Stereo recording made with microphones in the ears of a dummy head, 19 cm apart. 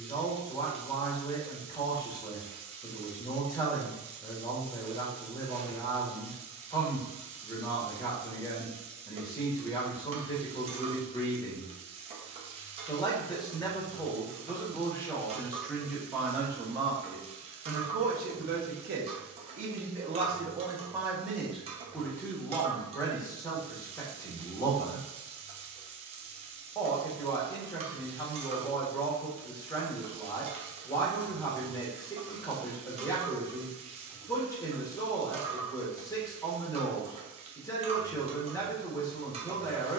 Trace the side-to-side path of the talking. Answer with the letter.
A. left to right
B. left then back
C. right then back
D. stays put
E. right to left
C.